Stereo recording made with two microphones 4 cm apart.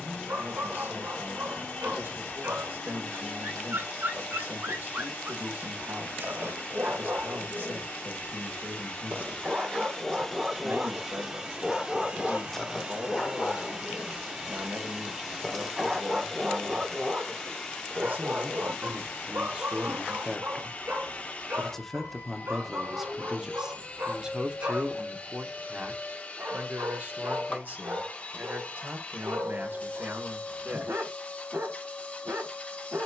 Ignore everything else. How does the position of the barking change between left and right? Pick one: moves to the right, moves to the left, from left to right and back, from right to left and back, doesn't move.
from right to left and back.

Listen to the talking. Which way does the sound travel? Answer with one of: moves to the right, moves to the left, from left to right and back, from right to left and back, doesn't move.
from right to left and back.